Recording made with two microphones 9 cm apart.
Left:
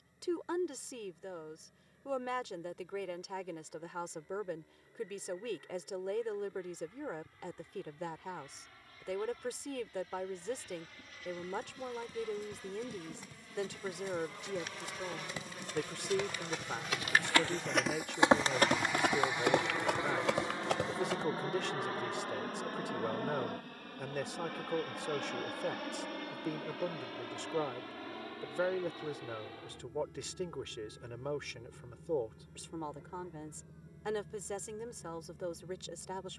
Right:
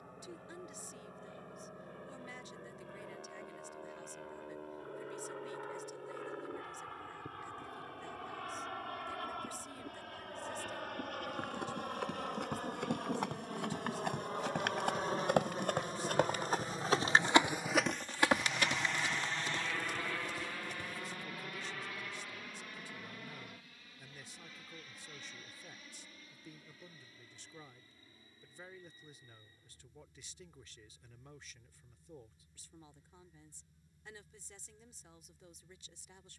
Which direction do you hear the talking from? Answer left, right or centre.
left.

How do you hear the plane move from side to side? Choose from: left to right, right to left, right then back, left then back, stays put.
right to left.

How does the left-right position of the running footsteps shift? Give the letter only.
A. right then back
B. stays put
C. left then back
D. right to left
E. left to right
D.